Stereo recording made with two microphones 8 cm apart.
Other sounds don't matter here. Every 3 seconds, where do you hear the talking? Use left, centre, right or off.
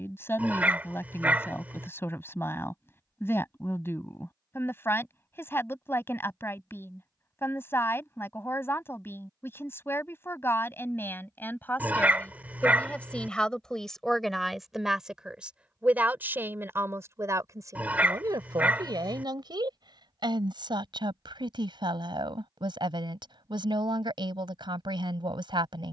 left, left, left, left, centre, right, right, right, right.